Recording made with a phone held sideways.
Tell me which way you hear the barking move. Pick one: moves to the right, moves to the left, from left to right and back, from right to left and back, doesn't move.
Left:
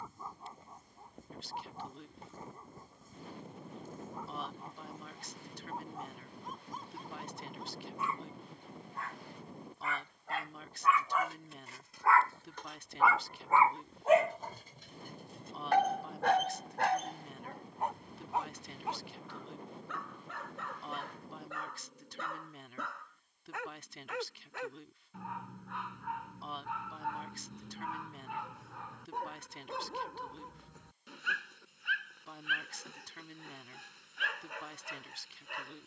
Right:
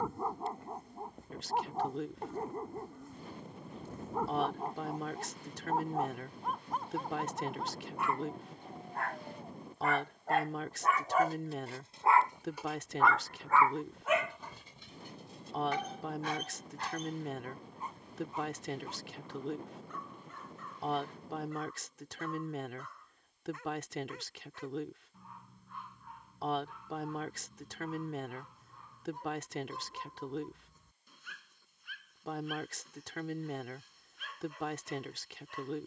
moves to the left.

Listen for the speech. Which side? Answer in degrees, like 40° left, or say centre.
80° right.